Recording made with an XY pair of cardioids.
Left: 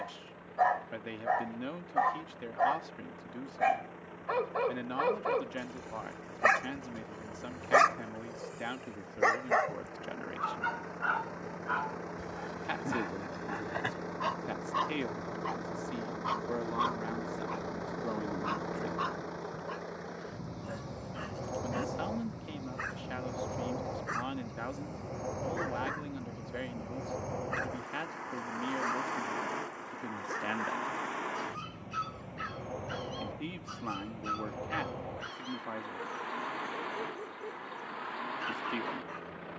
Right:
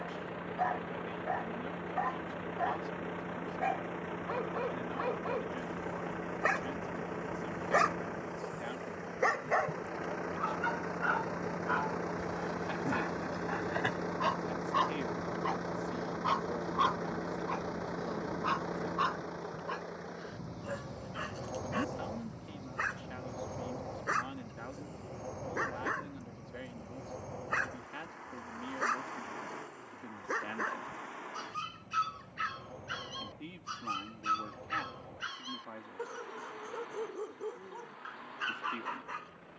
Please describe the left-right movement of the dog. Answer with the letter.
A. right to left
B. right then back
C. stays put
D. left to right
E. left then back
D.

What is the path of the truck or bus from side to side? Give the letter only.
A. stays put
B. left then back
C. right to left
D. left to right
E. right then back
C.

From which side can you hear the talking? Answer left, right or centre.
left.